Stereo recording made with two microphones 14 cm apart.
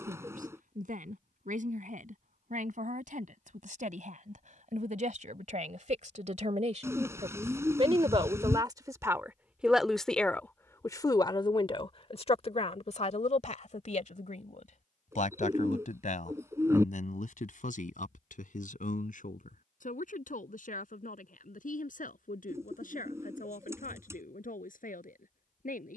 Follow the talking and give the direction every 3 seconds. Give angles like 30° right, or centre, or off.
70° right, 70° right, 40° right, 10° left, 60° left, 70° left, 80° left, 80° left, 80° left.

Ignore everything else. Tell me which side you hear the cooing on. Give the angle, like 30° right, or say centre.
20° right.